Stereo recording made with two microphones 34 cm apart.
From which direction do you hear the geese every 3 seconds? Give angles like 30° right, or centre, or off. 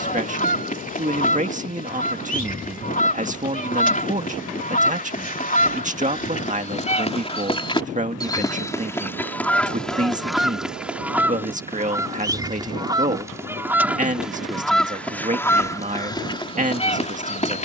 20° left, 20° left, 20° left, centre, 10° right, 10° left.